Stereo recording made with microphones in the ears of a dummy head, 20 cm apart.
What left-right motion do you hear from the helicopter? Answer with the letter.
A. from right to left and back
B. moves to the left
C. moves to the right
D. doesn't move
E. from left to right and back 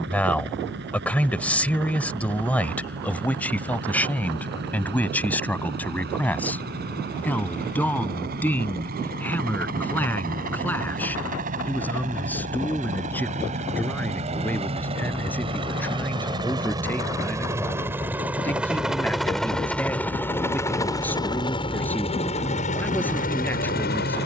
B.